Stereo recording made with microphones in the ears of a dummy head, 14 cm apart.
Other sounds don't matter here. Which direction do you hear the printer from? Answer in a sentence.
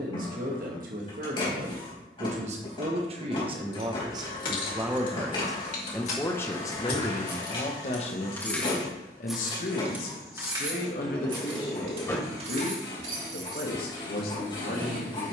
In this clip you hear the printer on the left.